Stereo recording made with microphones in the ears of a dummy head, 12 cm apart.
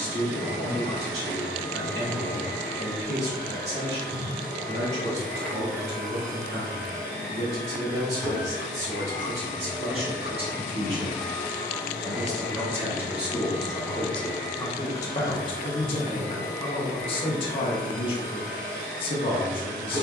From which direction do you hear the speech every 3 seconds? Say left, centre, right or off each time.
right, right, right, right, centre, left, left.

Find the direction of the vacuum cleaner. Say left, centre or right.
centre.